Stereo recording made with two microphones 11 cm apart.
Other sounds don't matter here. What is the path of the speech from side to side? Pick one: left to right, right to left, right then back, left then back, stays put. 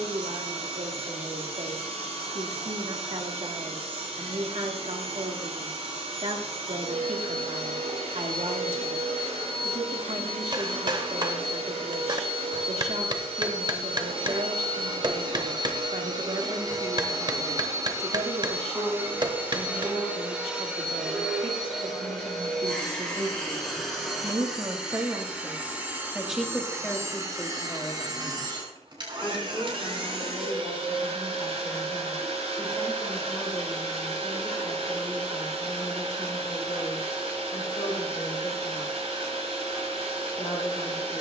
right to left.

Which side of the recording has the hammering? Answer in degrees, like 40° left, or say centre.
40° right.